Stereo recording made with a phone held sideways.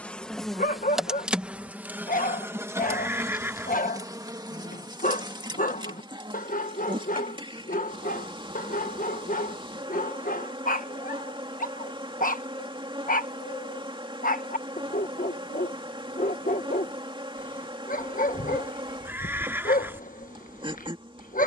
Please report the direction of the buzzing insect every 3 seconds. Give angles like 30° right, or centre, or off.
10° right, 20° right, 30° right, 30° right, 30° right, 30° right, 30° right.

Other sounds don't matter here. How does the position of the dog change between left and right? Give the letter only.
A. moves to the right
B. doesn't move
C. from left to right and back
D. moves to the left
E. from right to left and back
B.